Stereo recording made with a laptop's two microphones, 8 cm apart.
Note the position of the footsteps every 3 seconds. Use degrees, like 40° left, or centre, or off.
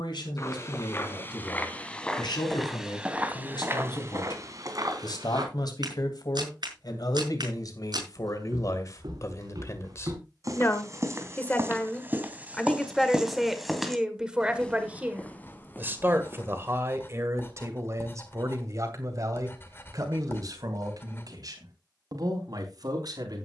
20° left, 40° right, 60° right, 40° right, 10° right, 30° left, off, off.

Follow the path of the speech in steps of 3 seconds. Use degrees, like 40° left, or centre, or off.
70° left, 70° left, 50° left, 30° left, centre, 30° right, 50° right, 60° right.